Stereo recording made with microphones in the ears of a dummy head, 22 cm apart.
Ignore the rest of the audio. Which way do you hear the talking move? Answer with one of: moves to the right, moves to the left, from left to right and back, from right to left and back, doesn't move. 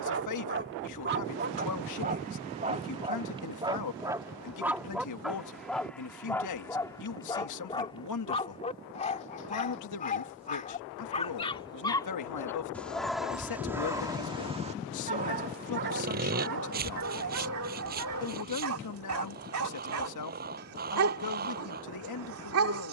doesn't move.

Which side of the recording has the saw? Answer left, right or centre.
right.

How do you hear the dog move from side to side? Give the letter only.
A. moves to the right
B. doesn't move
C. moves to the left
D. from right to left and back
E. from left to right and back
D.